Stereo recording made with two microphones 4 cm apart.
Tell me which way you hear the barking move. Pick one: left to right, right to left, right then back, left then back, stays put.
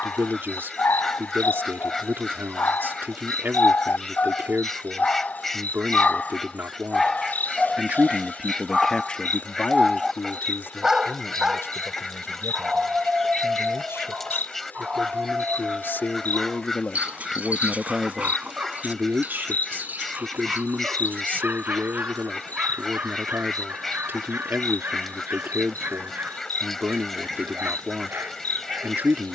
left to right.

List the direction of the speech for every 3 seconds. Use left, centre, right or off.
right, right, right, left, left, left, right, right, right, right.